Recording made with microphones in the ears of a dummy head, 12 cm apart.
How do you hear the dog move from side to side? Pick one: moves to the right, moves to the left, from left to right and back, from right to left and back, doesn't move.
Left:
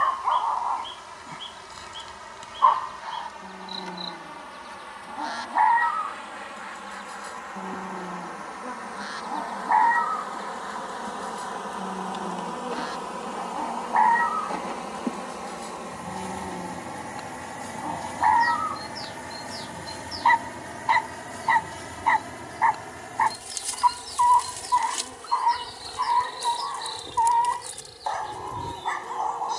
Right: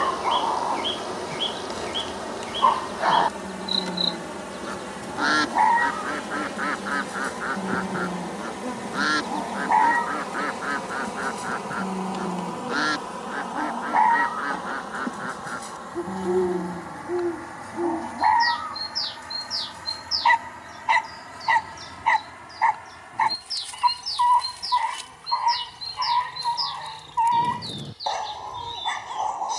doesn't move.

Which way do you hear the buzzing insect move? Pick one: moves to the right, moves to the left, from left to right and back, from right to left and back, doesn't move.
moves to the left.